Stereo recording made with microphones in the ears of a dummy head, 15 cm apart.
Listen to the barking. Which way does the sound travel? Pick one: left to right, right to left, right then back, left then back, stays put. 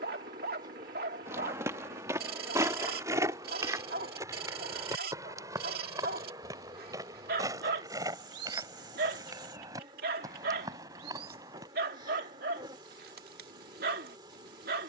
stays put.